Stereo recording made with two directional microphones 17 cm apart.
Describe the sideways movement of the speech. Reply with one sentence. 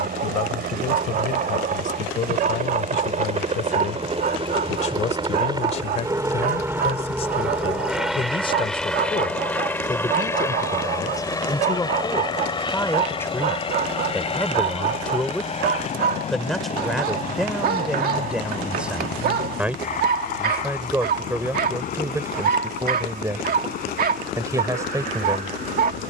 You can hear the speech travel towards the right.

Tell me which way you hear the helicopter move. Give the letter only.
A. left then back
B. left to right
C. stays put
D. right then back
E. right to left
E.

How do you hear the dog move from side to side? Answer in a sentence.
You can hear the dog stay in one place.